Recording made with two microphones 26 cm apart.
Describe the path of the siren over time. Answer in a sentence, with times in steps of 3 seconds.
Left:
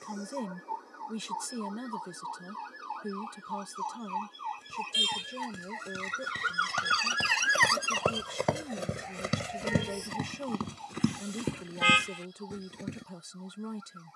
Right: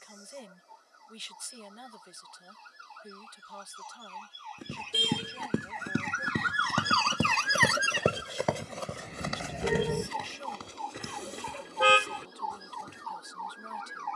You can hear the siren on the left from 0 s, in the centre from 6 s and on the right from 9 s.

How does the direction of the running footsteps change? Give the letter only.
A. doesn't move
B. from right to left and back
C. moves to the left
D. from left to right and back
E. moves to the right
C.